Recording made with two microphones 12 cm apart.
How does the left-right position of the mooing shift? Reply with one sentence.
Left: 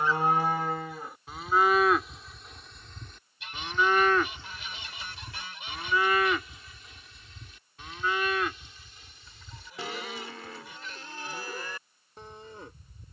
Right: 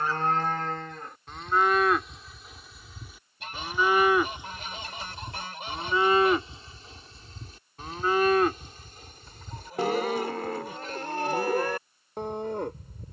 In this clip you hear the mooing move from left to right.